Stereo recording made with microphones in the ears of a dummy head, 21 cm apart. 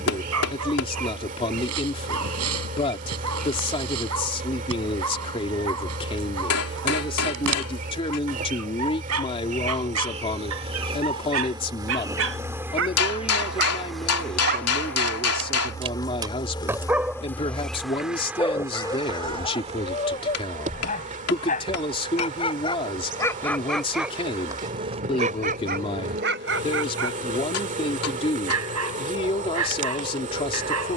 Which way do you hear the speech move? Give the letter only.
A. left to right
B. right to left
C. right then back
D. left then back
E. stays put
E.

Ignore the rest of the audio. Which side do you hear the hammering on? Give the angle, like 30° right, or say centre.
80° left.